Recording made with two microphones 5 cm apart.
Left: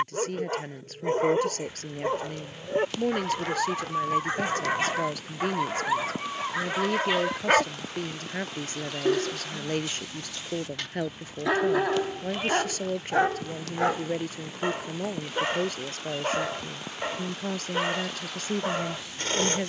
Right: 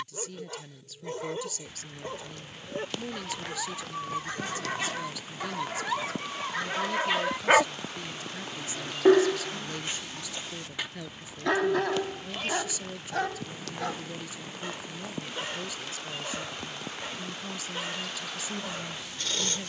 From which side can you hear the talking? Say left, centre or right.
left.